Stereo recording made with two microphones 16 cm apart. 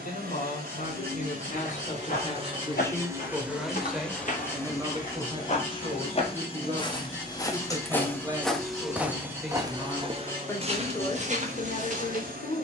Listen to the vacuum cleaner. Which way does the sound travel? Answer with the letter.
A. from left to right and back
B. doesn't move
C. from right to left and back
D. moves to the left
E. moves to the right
C.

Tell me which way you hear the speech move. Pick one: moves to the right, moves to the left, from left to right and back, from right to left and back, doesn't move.
from left to right and back.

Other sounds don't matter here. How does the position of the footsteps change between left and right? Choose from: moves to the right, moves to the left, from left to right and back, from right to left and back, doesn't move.
moves to the right.